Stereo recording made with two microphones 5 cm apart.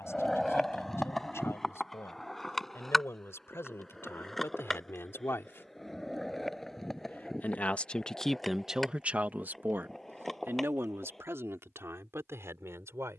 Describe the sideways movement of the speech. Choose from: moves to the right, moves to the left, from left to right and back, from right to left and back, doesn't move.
moves to the right.